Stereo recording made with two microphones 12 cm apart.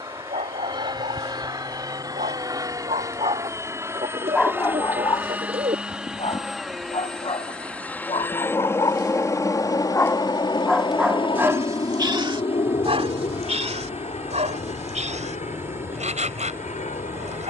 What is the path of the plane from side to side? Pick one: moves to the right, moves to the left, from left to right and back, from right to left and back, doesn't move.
moves to the left.